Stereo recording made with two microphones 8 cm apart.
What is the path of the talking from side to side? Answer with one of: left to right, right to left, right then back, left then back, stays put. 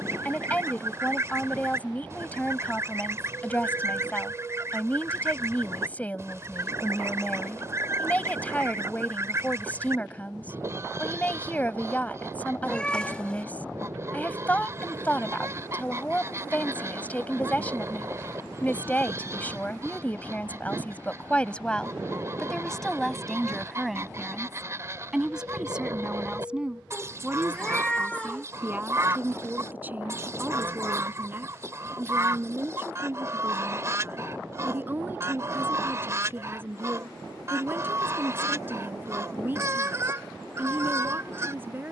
left to right.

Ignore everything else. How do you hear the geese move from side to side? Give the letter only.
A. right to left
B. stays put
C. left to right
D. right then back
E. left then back
B.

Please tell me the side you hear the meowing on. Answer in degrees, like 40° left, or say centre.
10° left.